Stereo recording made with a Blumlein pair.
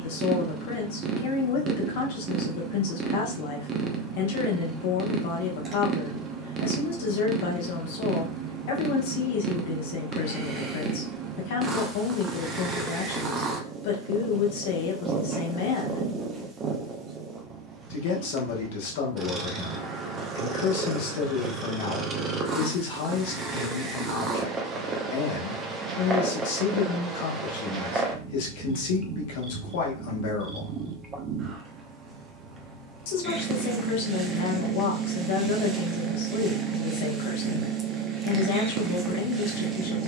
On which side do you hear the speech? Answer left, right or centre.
left.